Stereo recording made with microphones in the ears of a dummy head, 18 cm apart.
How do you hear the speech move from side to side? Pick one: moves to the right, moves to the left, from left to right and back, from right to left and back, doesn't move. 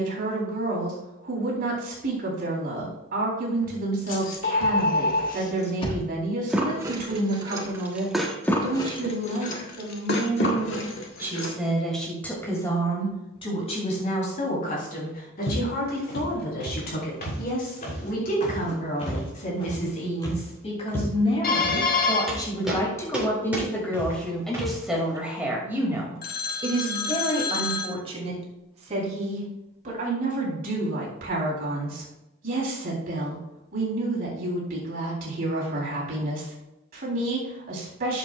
from right to left and back.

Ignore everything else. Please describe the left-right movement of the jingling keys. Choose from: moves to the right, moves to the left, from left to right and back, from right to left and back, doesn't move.
from left to right and back.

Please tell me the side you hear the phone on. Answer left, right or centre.
left.